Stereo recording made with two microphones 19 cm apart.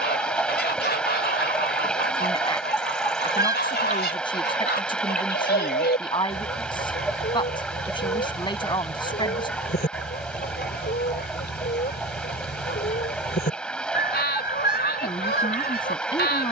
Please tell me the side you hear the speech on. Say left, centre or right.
left.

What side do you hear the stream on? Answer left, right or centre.
centre.